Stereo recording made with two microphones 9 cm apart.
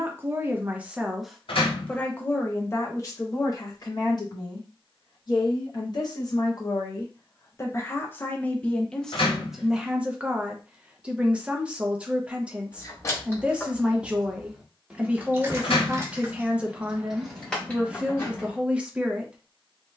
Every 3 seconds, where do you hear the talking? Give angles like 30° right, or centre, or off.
centre, 40° left, 30° left, 10° right, 10° right, 10° right, 10° right.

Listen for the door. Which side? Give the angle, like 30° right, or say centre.
70° left.